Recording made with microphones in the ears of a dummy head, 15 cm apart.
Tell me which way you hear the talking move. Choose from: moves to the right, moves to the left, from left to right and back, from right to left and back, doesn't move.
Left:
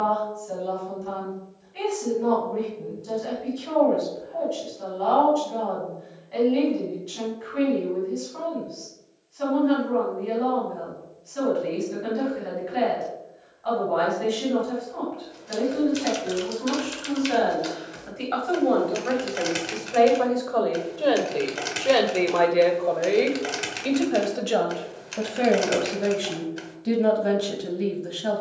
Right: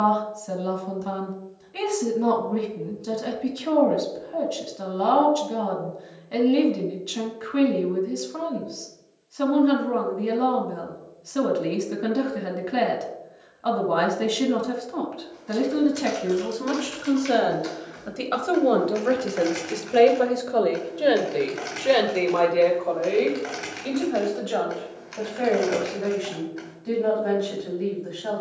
moves to the left.